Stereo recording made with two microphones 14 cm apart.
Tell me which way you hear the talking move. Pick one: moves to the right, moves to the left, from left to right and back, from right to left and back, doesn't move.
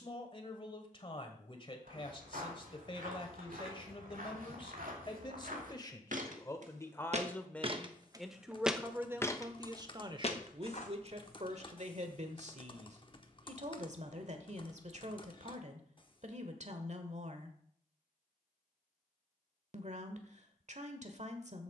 moves to the right.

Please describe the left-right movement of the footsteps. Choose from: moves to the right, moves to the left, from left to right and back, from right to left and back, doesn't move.
moves to the left.